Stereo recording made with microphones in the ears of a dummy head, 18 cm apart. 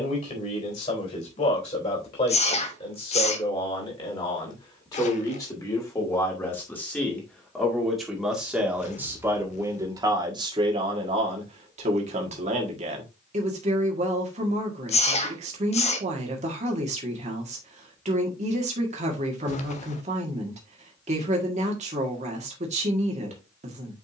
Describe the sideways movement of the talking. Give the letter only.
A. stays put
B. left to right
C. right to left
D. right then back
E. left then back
B.